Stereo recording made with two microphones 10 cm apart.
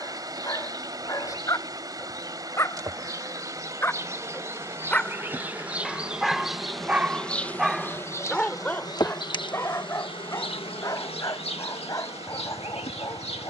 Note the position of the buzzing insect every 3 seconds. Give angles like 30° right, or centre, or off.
40° right, 20° right, 20° left, 60° left, 80° left.